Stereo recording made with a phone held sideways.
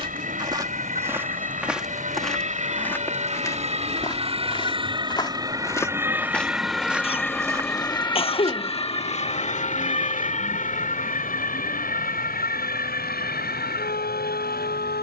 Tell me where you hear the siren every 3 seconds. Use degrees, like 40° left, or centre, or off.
50° right, 30° right, 10° left, 50° left, 70° left.